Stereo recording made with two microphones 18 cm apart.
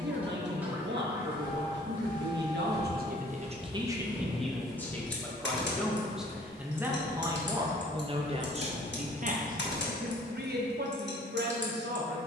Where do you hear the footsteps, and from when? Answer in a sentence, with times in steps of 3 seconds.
You can hear the footsteps on the right from 0 s, in the centre from 3 s, on the left from 6 s and in the centre from 9 s.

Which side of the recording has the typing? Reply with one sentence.
In this clip you hear the typing on the left.